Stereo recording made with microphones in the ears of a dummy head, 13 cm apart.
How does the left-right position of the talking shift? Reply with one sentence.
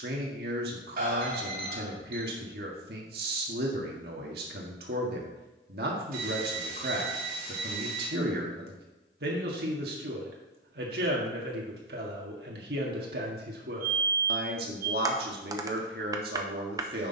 You can hear the talking stay in one place.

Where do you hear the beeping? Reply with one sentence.
You can hear the beeping on the right.